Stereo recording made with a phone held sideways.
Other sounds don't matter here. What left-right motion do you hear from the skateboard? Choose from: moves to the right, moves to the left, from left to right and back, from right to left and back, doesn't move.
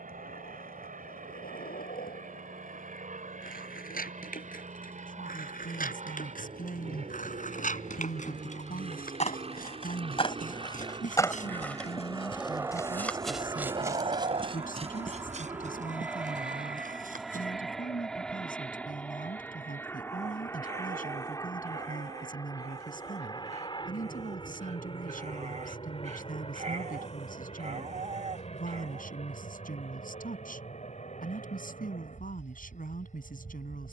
moves to the right.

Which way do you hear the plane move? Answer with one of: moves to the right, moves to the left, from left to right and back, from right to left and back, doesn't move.
moves to the left.